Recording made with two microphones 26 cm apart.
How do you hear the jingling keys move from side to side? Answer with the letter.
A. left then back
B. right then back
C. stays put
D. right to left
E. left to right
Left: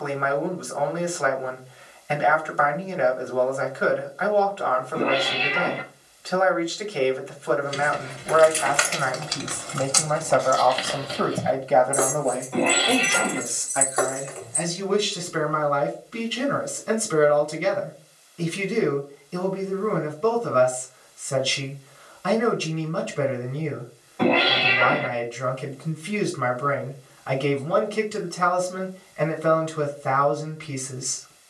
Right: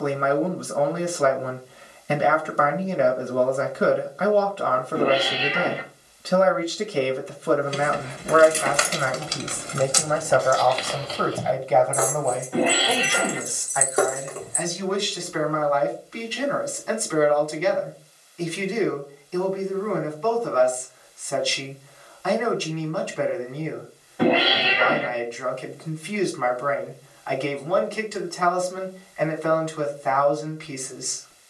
A.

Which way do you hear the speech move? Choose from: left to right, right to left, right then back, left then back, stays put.
right to left.